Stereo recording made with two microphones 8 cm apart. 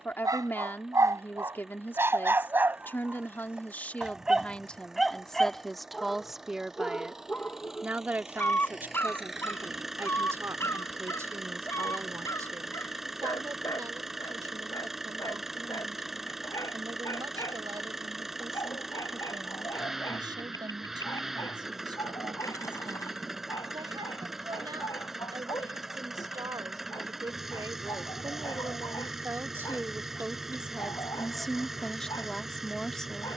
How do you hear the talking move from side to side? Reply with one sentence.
In this clip you hear the talking go right and come back.